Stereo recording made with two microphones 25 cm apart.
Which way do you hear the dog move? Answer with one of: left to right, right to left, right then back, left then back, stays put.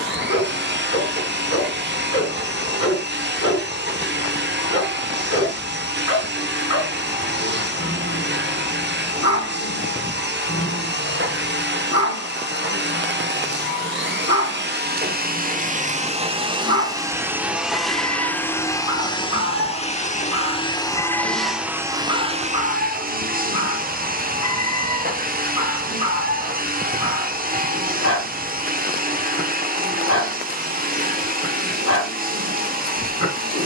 stays put.